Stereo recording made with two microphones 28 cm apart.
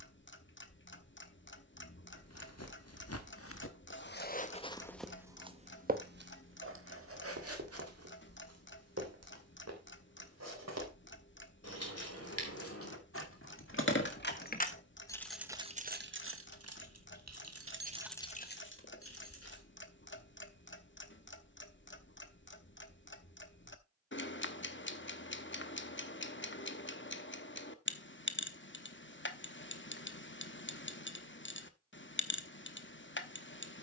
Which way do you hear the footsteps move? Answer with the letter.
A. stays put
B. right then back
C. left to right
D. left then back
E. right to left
C.